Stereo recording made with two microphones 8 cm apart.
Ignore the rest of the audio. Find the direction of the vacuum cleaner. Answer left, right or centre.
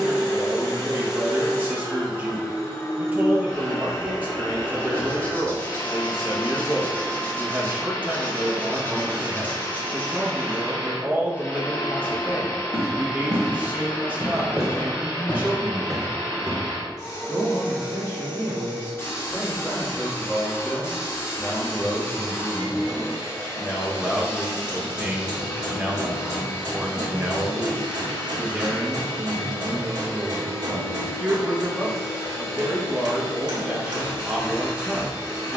left.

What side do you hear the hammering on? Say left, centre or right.
right.